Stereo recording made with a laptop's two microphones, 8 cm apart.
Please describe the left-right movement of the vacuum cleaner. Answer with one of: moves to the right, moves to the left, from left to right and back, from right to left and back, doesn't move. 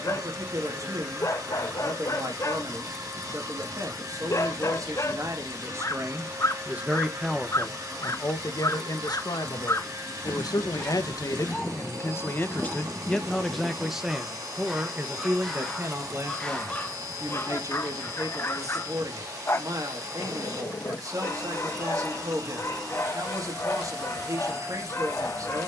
doesn't move.